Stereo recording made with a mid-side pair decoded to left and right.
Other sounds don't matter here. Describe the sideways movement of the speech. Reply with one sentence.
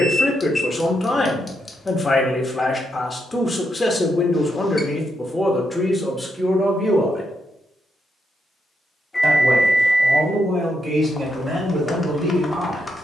In this clip you hear the speech move to the right.